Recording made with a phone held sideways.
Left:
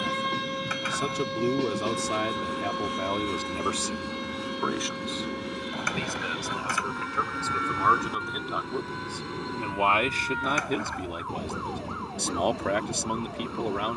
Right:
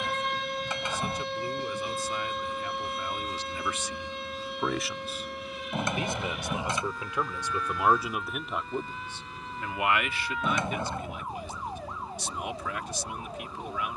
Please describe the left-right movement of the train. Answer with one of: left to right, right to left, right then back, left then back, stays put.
stays put.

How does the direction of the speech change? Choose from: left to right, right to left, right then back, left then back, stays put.
right then back.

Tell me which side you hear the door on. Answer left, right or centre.
right.